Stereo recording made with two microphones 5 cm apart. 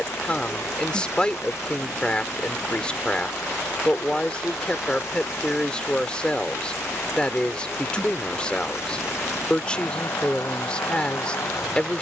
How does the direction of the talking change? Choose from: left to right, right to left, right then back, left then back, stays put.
stays put.